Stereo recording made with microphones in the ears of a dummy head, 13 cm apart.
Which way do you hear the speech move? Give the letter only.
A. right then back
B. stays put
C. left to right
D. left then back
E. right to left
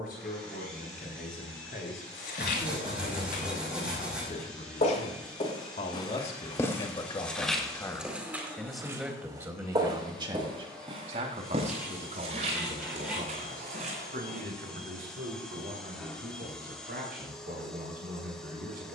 C.